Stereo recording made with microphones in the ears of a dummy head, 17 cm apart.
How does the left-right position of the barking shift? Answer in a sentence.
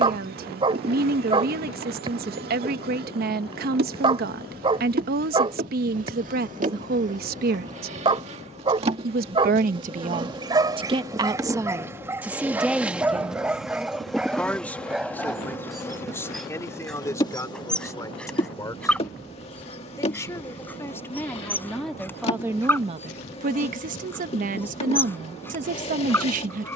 In this clip you hear the barking move from right to left.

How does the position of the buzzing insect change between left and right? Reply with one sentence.
In this clip you hear the buzzing insect go from the right side to the left.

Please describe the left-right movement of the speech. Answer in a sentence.
You can hear the speech move from right to left and back again.